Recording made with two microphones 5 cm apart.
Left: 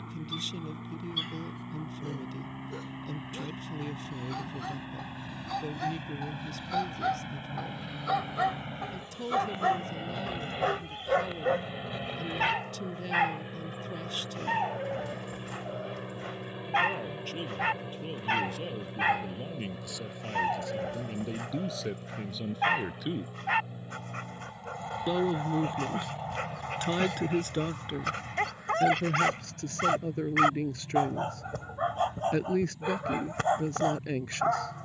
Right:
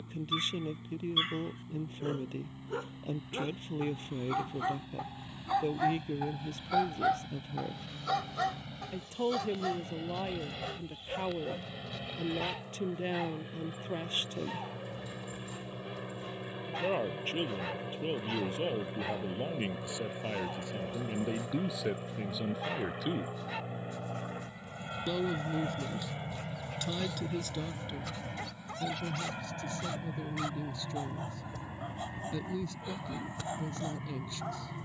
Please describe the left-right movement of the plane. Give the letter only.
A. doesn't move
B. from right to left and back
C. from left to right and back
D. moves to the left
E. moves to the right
E.